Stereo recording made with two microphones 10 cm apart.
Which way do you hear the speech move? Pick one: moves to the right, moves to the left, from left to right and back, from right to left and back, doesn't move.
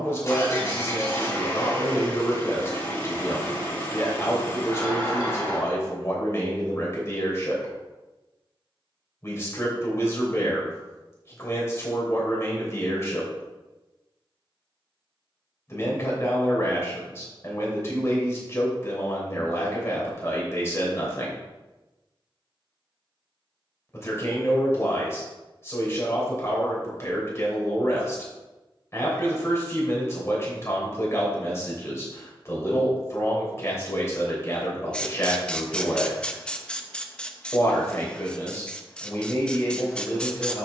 doesn't move.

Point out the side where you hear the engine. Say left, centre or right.
left.